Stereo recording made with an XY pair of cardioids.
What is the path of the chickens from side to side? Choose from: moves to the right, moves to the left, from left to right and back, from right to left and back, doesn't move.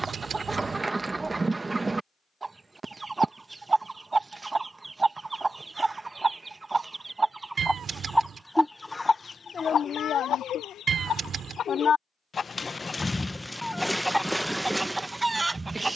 from right to left and back.